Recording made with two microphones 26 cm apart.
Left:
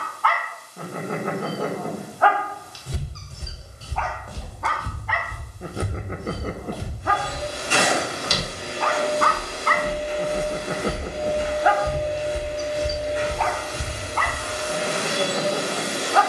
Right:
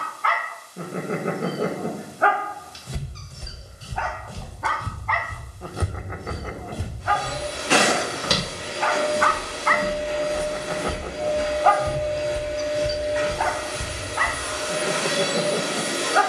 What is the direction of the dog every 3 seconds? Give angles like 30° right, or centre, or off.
20° right, centre, 40° left, 30° left, 10° right, 20° right.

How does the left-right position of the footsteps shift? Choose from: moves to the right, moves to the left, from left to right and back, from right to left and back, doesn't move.
from left to right and back.